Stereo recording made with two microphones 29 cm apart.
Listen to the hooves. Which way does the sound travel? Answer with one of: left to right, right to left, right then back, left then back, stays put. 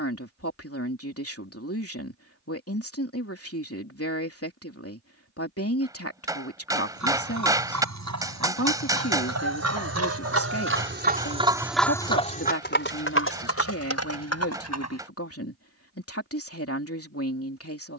right to left.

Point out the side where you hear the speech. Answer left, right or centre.
left.